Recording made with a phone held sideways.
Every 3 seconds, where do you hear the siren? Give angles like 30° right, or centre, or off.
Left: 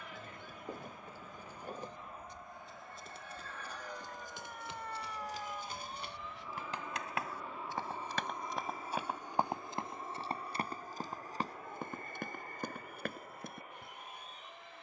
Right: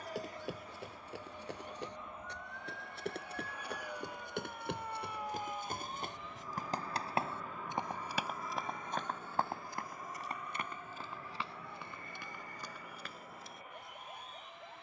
40° left, centre, 40° right, 60° right, 70° right.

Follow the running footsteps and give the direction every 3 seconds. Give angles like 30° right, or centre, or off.
80° right, 60° right, 20° right, 30° left, 50° left.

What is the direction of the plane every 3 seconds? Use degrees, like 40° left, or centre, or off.
30° right, 10° right, 20° left, 30° left, 40° left.